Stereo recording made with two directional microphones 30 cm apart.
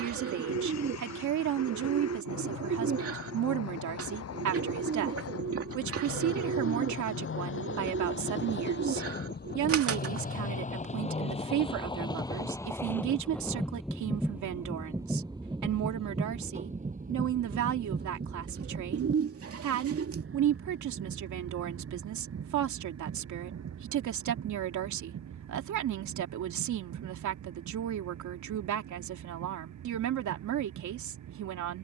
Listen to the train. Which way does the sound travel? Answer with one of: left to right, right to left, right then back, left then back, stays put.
left to right.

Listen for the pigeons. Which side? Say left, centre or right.
right.